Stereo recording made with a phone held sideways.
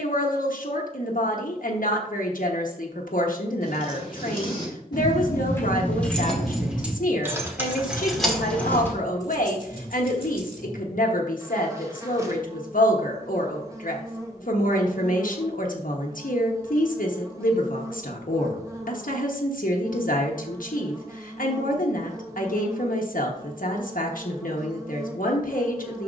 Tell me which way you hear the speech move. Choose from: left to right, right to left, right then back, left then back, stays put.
stays put.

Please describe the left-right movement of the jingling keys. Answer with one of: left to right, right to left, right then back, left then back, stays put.
right then back.